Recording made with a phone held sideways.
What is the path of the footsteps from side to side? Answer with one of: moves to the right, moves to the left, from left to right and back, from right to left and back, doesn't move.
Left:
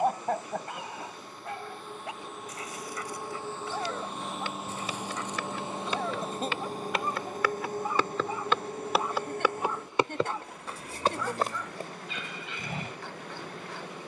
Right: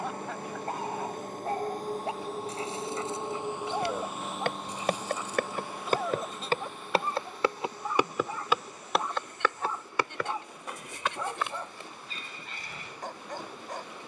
moves to the left.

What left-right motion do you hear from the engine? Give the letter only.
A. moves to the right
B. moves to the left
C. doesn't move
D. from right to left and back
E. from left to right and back
B.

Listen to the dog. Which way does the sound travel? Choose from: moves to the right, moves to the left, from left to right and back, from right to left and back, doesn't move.
from right to left and back.